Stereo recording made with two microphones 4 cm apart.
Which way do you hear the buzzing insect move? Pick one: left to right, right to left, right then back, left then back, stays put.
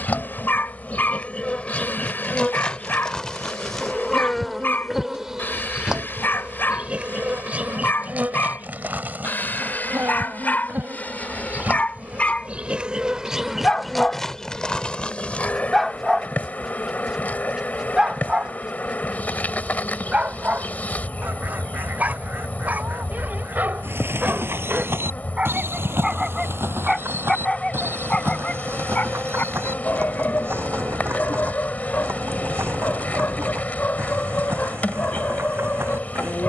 right then back.